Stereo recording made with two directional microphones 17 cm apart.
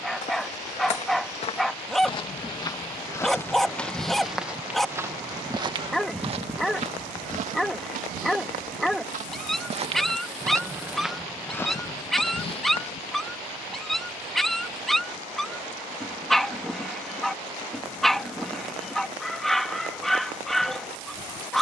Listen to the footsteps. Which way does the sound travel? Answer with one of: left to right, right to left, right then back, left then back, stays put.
right then back.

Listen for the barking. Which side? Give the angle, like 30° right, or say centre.
centre.